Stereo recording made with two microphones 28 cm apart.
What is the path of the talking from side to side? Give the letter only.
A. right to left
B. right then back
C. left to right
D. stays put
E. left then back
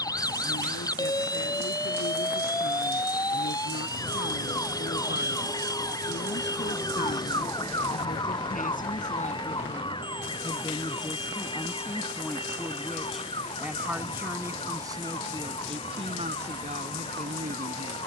C.